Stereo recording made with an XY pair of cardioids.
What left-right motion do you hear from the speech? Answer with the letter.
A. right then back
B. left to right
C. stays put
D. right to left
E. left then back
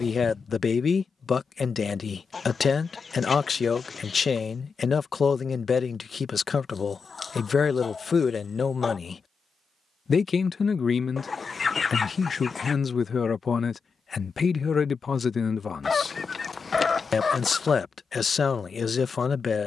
C.